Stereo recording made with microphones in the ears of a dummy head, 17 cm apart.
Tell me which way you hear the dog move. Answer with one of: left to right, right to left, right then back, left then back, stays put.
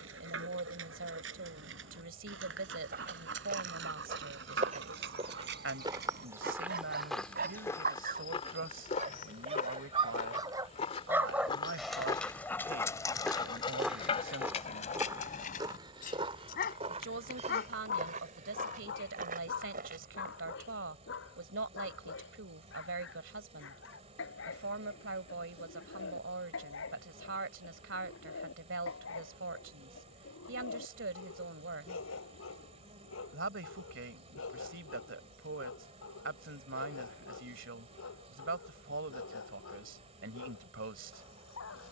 right to left.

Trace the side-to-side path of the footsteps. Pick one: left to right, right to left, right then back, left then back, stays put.
left then back.